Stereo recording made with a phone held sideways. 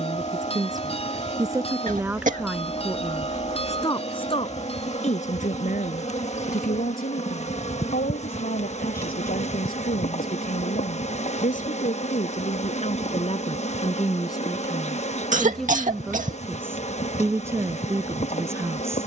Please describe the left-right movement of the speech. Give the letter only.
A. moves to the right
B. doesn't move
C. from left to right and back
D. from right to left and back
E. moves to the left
D.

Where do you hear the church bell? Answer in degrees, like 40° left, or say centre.
40° left.